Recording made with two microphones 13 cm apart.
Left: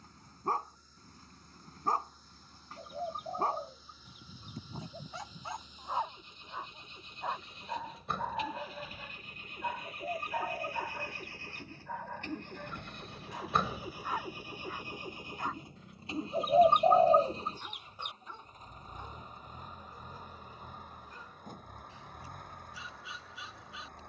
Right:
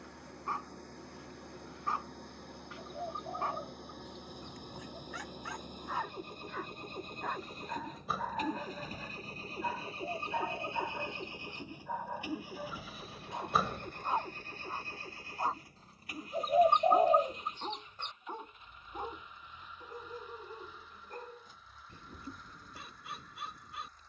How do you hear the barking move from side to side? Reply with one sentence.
You can hear the barking move from left to right.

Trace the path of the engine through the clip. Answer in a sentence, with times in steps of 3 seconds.
You can hear the engine on the right from 0 s, in the centre from 12 s and on the left from 15 s.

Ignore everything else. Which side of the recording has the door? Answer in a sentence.
You can hear the door in the centre.